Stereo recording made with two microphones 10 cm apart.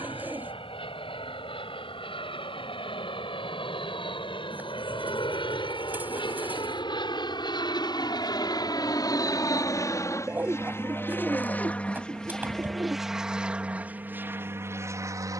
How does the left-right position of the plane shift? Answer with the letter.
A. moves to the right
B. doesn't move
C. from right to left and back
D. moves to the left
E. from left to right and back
A.